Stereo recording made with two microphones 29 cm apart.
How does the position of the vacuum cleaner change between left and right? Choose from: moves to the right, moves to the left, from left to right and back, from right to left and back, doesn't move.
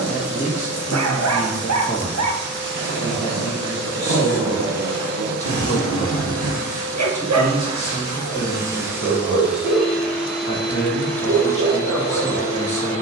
moves to the left.